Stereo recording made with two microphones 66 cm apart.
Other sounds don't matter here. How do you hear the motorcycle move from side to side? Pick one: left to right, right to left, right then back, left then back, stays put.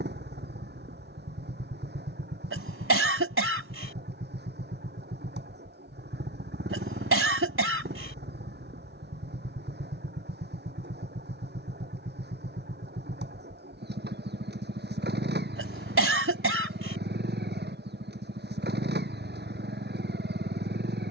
stays put.